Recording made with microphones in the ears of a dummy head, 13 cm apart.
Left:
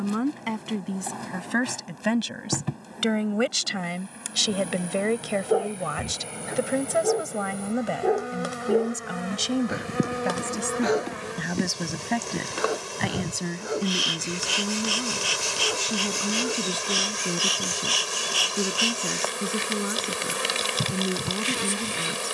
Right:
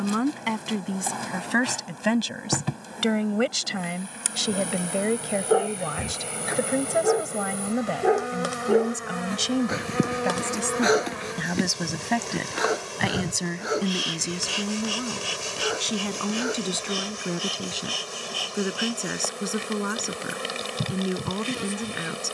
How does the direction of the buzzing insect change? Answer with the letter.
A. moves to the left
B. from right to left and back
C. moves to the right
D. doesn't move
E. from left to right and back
A.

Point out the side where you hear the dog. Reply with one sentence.
You can hear the dog on the right.